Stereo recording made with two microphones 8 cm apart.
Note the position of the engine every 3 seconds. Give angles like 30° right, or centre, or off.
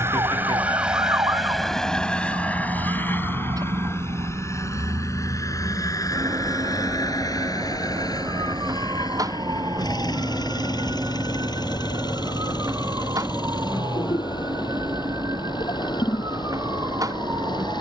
centre, 40° left, 50° left, 50° left, 60° left, 60° left.